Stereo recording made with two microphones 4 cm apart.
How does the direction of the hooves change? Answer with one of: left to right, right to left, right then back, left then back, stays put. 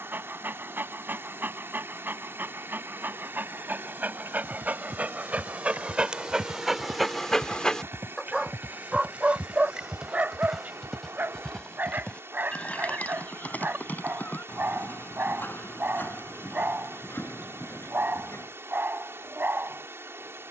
right to left.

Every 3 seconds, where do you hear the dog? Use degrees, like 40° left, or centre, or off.
50° right, 40° right, centre, 30° right, 40° right, 40° right, 40° right.